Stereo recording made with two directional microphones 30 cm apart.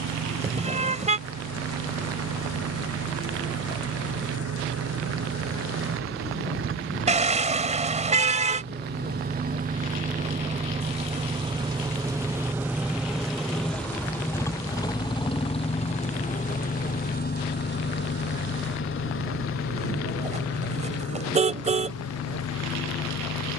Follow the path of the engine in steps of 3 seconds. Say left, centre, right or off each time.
right, right, right, right, centre, left, left, left.